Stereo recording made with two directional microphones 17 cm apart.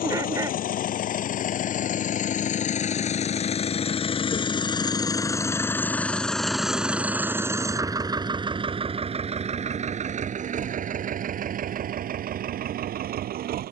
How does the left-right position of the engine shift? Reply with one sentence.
You can hear the engine go from the left side to the right.